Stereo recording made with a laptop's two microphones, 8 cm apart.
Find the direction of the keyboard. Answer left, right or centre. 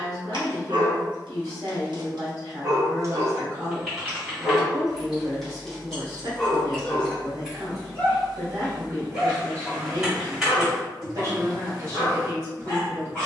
centre.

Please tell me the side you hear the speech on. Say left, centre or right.
right.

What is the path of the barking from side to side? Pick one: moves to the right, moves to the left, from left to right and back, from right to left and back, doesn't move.
moves to the left.